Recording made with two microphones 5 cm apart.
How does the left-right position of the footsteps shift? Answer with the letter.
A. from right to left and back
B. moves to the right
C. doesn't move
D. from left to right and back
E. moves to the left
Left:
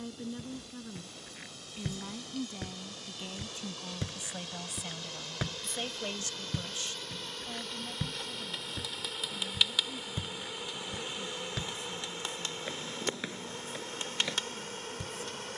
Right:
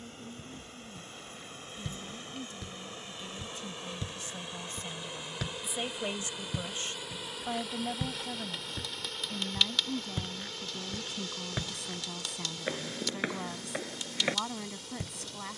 B.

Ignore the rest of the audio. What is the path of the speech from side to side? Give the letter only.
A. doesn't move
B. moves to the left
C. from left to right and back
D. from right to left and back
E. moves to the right
E.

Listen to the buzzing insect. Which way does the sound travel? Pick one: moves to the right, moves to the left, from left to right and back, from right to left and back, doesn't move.
moves to the left.